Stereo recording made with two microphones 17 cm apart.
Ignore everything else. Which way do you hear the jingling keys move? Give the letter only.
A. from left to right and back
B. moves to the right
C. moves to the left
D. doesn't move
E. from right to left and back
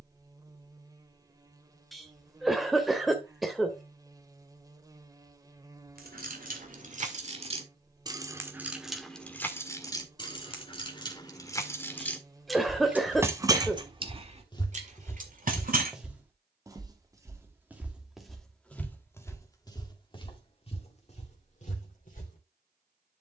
E.